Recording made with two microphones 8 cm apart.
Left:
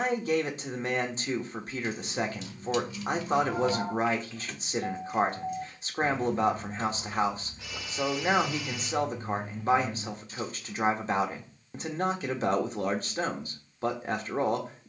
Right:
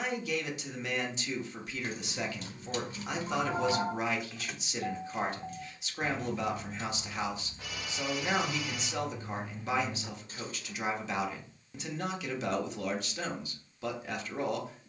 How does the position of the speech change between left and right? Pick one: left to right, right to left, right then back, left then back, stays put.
stays put.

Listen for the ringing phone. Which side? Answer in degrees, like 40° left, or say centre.
50° right.